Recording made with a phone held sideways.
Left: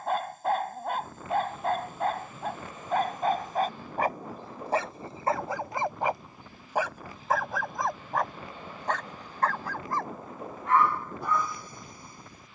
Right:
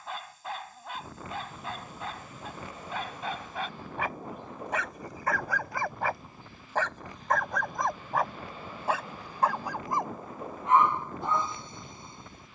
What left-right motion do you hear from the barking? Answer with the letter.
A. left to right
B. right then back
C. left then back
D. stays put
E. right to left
A.